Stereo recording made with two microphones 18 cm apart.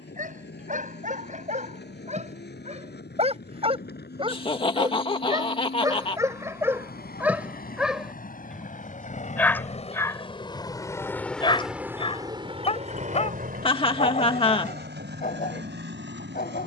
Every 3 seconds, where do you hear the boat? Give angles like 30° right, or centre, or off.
70° left, 60° left, 50° left, 20° left, 50° right, 80° right.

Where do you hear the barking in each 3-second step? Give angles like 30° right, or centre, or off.
40° right, 30° right, 10° right, 20° left, 40° left, 50° left.